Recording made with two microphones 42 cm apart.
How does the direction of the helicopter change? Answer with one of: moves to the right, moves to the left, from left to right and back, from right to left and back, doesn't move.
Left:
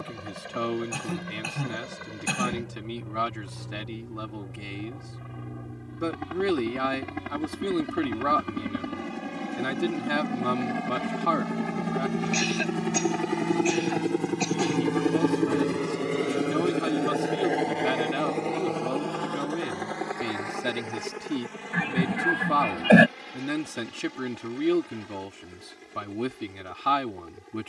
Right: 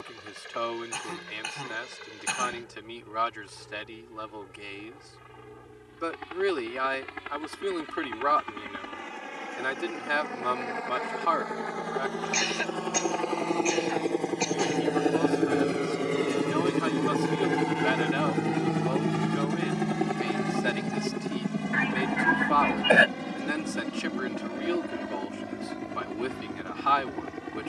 moves to the right.